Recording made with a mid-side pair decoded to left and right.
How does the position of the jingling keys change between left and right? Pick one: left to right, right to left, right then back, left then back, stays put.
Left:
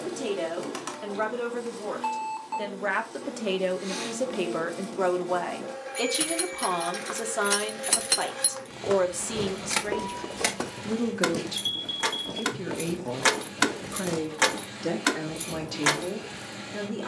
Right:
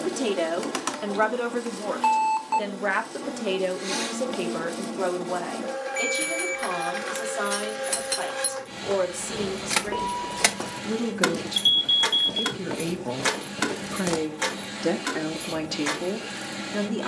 right then back.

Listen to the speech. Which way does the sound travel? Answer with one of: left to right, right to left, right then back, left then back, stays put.
left then back.